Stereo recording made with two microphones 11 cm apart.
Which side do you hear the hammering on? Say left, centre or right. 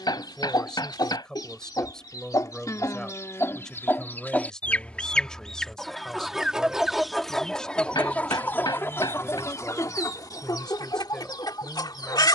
left.